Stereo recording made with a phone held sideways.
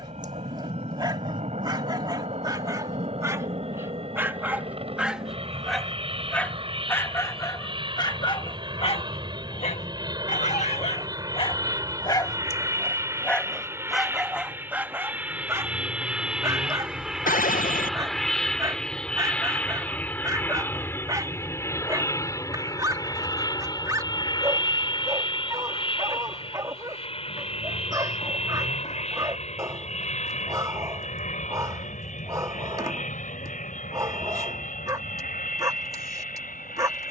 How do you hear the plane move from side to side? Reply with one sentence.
You can hear the plane travel towards the left.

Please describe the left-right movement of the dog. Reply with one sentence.
You can hear the dog go left and come back.